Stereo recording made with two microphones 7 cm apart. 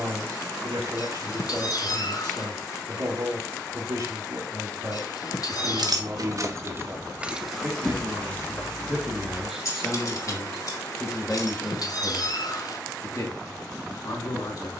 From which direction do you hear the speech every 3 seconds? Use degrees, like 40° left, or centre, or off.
50° right, 50° right, 30° right, 10° left, 40° left.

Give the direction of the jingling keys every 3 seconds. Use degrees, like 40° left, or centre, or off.
off, 60° right, 10° right, 50° left, off.